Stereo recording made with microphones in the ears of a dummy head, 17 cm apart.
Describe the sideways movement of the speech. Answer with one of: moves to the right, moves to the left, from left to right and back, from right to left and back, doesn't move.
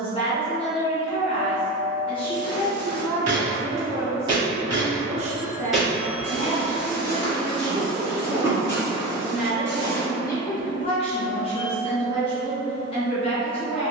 from left to right and back.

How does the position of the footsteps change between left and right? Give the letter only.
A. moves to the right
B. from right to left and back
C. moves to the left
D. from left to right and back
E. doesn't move
B.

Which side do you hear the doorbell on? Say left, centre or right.
left.